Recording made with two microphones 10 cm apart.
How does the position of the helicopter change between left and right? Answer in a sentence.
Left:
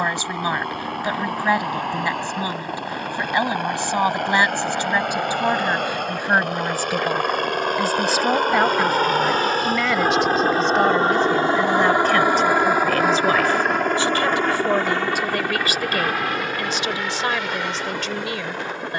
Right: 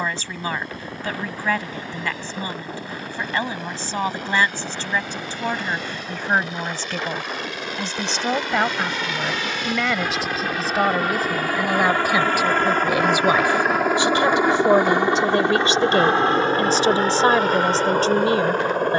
You can hear the helicopter move from left to right.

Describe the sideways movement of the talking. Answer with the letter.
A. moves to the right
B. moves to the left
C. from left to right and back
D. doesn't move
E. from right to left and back
A.